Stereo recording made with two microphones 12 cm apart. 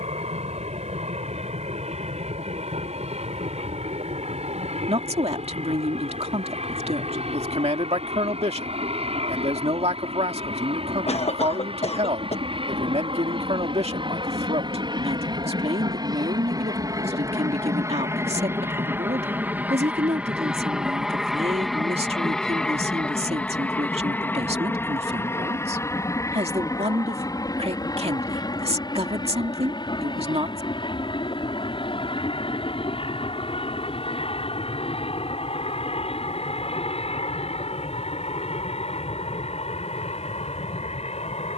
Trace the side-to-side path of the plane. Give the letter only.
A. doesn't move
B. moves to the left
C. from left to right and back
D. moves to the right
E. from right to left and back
B.